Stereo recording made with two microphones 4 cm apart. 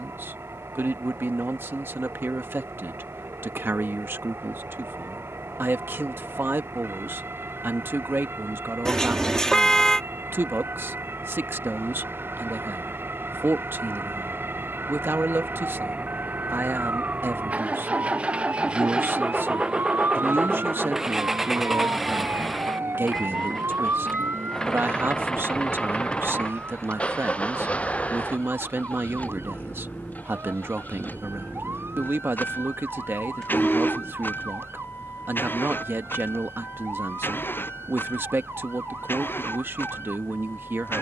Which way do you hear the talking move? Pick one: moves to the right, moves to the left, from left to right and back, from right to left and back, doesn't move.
doesn't move.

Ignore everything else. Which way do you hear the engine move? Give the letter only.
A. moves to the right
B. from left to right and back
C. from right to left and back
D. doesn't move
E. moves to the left
E.